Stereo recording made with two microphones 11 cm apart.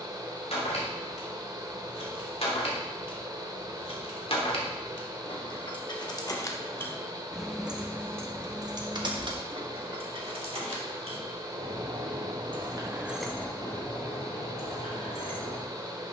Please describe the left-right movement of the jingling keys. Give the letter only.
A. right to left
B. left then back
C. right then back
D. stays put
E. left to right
C.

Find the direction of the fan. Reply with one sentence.
You can hear the fan on the right.